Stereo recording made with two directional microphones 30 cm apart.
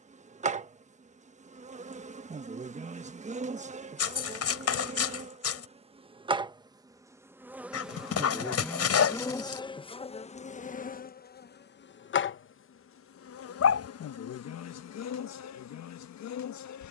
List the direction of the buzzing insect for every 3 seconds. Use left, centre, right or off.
right, right, centre, left, left, left.